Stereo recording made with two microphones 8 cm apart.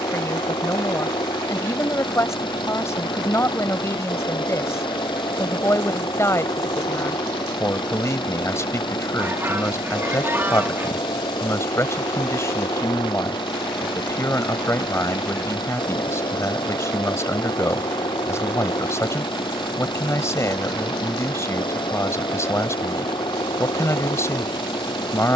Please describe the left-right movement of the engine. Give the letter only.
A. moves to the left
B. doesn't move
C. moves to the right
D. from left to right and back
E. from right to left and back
B.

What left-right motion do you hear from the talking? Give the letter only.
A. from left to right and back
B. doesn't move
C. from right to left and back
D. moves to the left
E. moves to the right
B.